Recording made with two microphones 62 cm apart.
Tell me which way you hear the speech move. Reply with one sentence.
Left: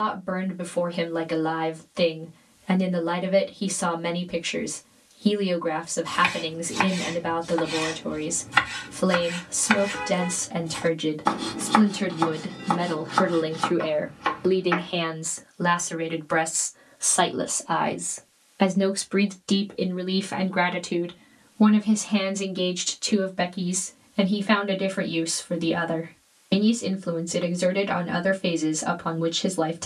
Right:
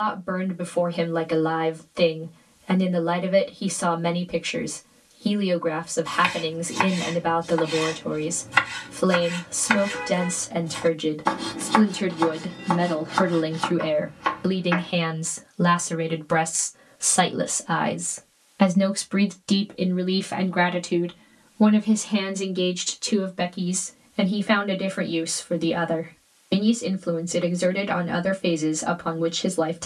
You can hear the speech move from left to right and back again.